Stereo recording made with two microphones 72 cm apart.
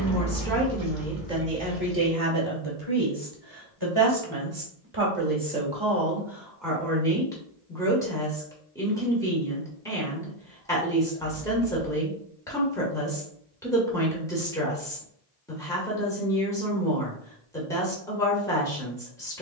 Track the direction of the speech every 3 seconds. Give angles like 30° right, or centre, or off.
10° right, 20° right, centre, centre, centre, centre, centre.